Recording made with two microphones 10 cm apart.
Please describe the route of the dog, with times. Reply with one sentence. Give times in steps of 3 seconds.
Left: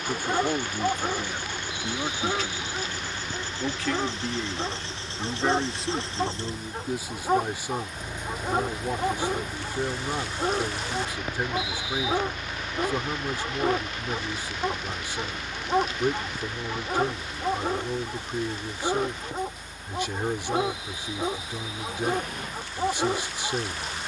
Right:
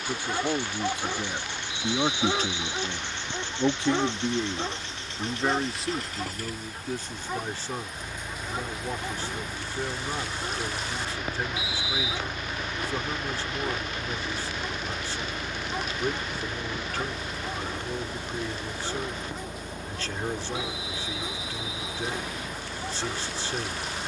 In this clip you hear the dog in the centre from 0 s and on the left from 6 s.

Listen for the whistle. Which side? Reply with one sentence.
You can hear the whistle on the left.